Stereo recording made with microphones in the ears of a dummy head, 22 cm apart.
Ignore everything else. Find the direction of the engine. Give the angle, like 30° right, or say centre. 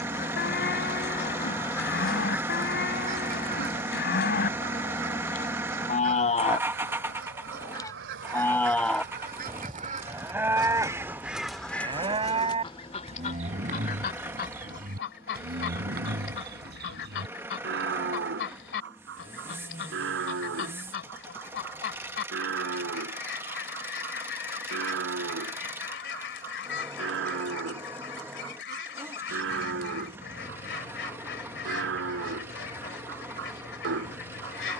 10° right.